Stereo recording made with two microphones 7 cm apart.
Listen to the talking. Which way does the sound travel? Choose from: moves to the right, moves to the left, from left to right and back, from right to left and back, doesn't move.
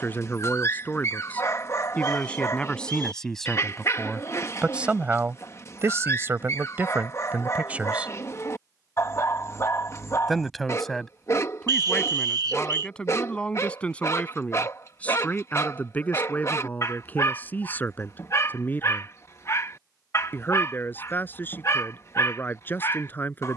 from left to right and back.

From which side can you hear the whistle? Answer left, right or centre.
right.